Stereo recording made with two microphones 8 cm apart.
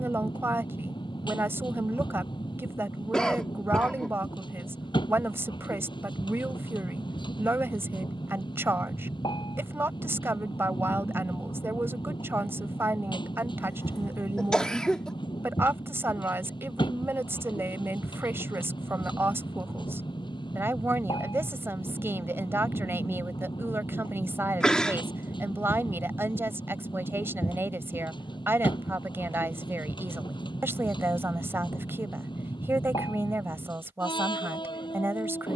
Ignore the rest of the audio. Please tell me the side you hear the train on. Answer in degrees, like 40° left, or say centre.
80° left.